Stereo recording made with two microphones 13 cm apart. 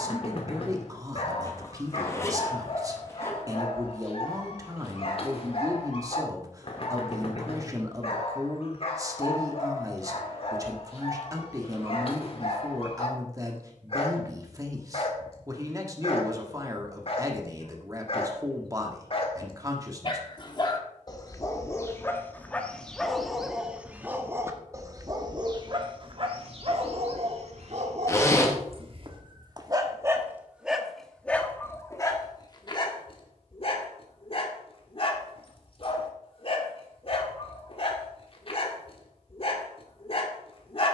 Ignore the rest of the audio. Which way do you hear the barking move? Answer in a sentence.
In this clip you hear the barking move from left to right and back again.